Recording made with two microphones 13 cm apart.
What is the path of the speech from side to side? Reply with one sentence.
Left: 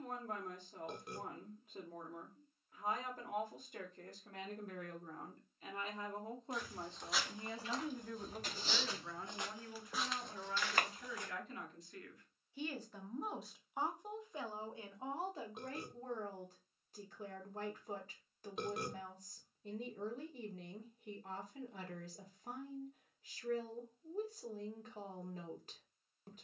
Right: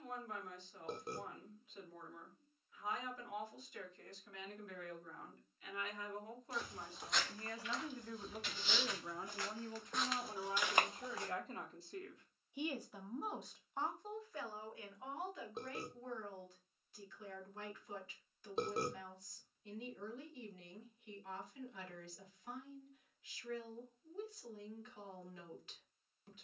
You can hear the speech move from left to right and back again.